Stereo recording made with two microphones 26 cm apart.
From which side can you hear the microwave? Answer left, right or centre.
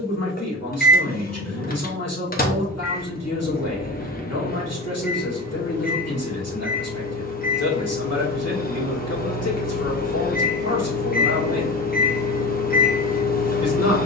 left.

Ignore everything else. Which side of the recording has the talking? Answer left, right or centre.
left.